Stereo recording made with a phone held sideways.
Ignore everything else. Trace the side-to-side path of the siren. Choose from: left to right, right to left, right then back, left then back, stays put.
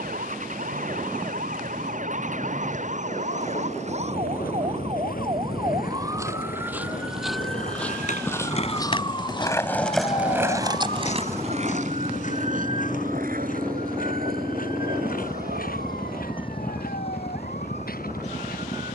right to left.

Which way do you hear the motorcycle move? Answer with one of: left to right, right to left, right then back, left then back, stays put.
right to left.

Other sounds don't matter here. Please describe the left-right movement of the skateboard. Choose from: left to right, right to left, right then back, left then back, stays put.
left to right.